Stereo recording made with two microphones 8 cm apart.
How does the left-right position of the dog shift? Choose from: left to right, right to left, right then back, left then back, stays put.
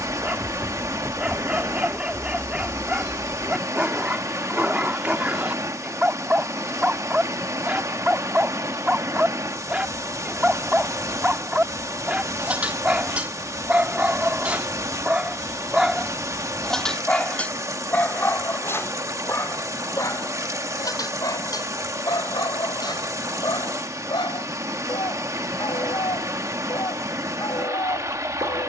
right to left.